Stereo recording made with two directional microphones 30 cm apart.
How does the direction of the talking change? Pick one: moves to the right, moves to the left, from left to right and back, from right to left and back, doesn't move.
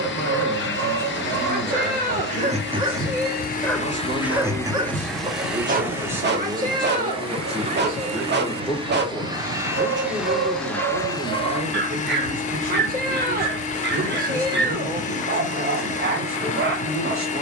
from right to left and back.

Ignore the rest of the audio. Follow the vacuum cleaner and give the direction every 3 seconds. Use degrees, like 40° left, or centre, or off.
40° left, 10° left, 20° right, centre, 20° left, 20° left.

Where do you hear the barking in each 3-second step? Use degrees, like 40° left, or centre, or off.
30° right, 10° right, 40° right, 40° right, 40° right, 40° right.